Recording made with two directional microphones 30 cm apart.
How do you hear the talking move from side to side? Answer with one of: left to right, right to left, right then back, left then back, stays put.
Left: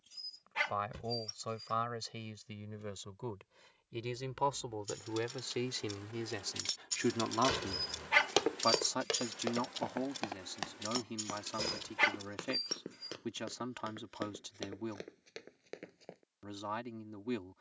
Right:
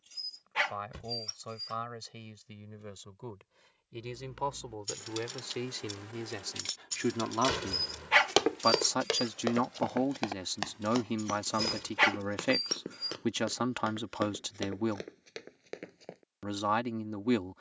left to right.